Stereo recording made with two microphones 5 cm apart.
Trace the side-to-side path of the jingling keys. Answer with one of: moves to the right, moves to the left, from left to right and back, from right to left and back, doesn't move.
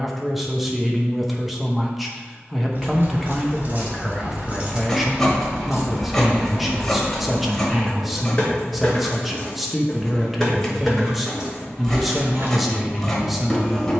from right to left and back.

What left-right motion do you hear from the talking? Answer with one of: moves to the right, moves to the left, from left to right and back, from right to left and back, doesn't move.
doesn't move.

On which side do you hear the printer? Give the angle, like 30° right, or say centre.
10° left.